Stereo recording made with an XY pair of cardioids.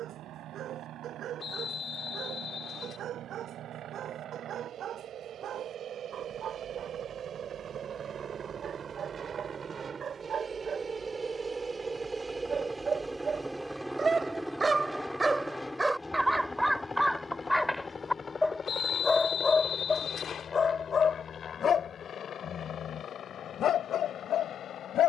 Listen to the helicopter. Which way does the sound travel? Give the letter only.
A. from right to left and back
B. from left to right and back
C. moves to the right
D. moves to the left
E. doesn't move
D.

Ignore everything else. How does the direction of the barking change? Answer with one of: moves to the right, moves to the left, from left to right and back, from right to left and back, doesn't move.
moves to the left.